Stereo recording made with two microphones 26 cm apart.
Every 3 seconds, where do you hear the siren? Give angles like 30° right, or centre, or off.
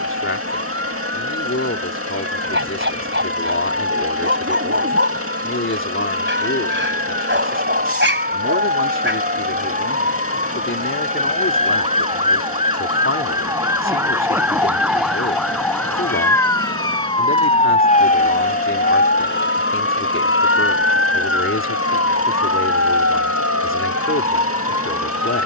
50° right, 40° right, 40° right, 30° right, 10° right, 10° left, 40° left, 60° left, 80° left.